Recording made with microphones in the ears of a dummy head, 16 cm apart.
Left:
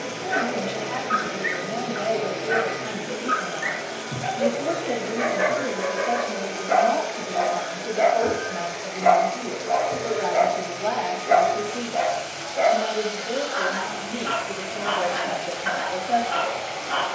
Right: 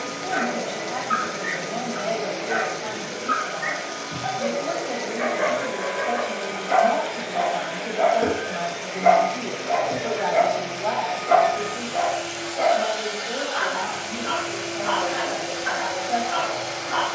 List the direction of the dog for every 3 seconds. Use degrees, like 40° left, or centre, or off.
60° left, 50° left, 30° left, centre, 50° left, 60° left.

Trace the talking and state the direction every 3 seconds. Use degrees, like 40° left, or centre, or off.
70° left, 50° left, centre, 10° left, 60° left, 60° left.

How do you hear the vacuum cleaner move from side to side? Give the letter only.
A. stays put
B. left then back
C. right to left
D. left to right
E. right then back
D.